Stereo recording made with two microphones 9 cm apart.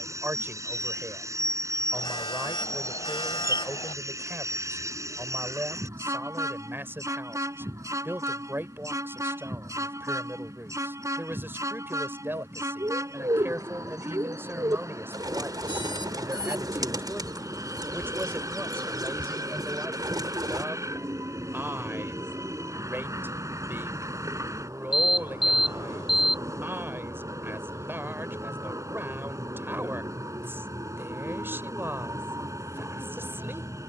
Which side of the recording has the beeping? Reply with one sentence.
You can hear the beeping on the left.